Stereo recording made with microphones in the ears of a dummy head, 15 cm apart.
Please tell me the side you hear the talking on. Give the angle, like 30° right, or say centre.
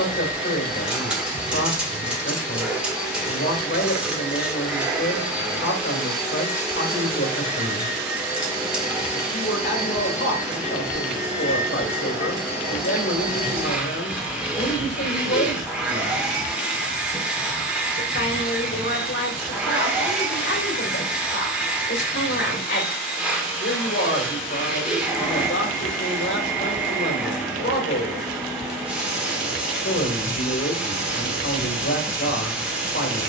80° left.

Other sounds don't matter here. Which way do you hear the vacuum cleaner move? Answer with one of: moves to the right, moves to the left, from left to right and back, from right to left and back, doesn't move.
doesn't move.